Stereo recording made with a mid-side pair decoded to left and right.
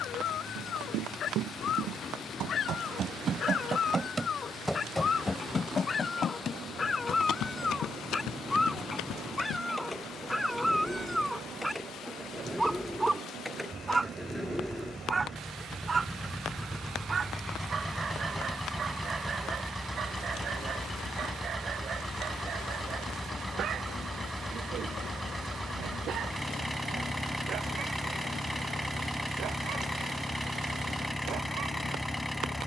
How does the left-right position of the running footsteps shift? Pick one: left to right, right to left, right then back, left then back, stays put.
right to left.